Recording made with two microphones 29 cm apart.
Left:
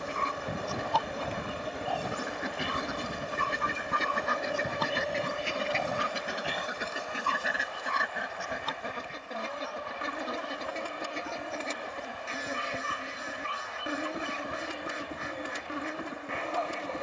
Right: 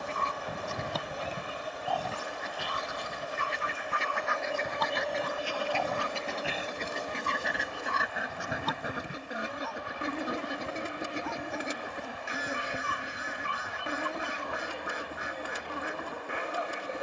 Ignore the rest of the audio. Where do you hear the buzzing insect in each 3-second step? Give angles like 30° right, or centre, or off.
30° left, 10° left, 40° right, 30° right, 10° left, 30° left.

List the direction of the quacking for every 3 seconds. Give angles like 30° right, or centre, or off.
50° left, 40° left, centre, 20° right, 20° right, 20° right.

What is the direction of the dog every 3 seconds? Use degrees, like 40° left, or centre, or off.
centre, 40° left, 30° right, 60° right, 60° right, 60° right.